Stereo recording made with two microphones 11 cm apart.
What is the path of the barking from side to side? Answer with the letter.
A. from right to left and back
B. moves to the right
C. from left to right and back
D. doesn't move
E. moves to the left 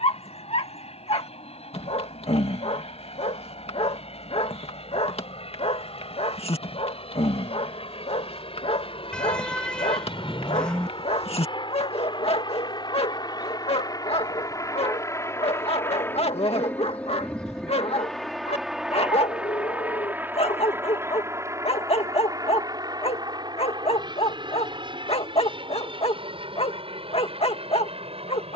D.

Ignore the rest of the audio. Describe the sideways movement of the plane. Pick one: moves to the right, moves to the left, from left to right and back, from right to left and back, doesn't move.
moves to the right.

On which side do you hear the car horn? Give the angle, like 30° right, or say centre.
10° left.